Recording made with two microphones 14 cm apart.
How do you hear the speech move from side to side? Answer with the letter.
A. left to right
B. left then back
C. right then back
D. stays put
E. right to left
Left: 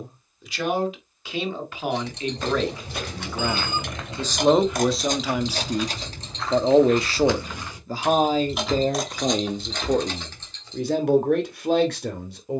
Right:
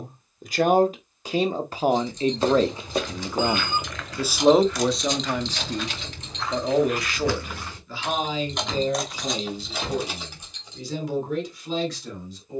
E.